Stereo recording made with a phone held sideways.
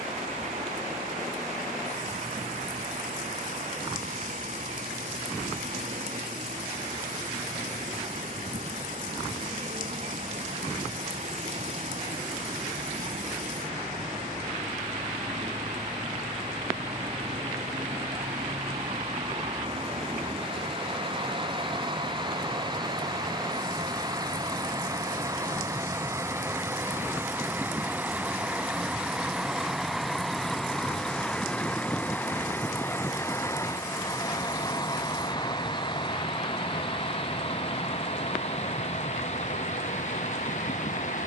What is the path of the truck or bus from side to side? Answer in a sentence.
In this clip you hear the truck or bus go from the right side to the left.